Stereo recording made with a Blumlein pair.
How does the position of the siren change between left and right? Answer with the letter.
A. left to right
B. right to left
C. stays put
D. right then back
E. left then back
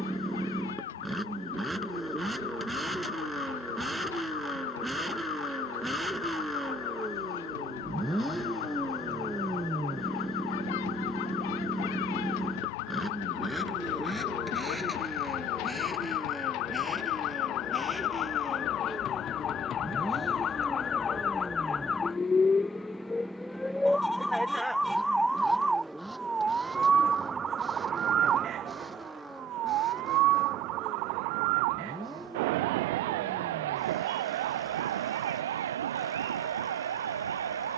A.